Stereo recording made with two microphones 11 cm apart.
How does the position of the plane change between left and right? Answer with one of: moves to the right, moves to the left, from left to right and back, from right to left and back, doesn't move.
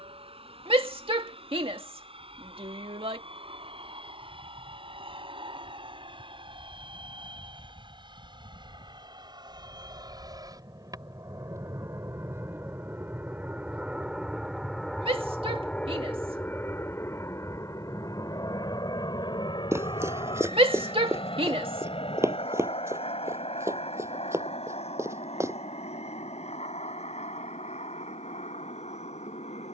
moves to the left.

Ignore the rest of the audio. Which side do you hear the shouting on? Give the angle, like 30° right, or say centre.
60° right.